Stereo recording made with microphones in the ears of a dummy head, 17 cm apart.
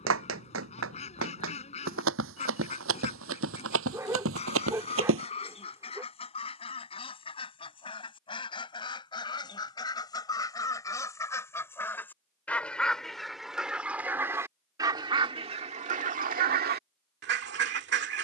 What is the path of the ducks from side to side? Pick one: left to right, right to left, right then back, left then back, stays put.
left to right.